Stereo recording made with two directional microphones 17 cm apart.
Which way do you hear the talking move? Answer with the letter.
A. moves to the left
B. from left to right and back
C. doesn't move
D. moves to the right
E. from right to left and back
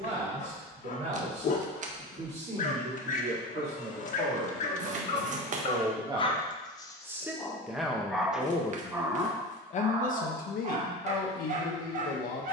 A.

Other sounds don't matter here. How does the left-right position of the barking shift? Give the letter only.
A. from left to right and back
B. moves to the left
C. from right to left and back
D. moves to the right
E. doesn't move
D.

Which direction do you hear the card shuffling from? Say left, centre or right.
right.